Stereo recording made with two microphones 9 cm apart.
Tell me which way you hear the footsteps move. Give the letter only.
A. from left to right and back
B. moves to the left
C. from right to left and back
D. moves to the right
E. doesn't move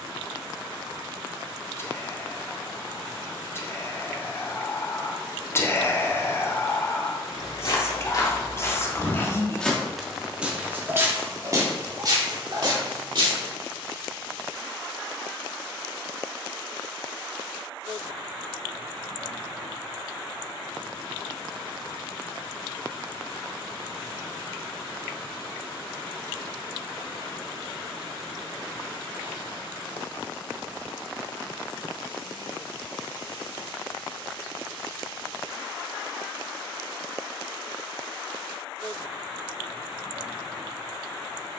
D.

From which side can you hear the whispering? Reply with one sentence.
In this clip you hear the whispering on the left.